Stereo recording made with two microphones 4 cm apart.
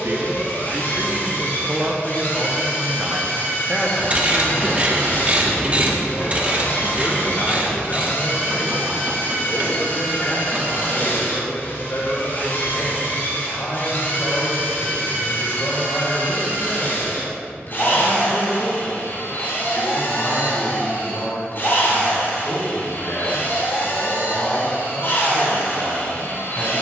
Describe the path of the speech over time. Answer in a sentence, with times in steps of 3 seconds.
You can hear the speech on the right from 0 s, in the centre from 3 s and on the left from 6 s.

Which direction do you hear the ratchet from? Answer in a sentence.
In this clip you hear the ratchet on the right.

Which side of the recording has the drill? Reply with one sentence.
In this clip you hear the drill on the left.